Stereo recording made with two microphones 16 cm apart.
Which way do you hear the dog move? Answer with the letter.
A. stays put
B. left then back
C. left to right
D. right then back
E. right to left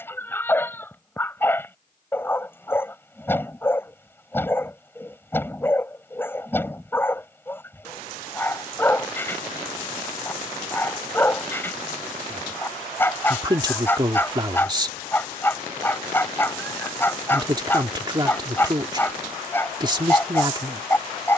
A.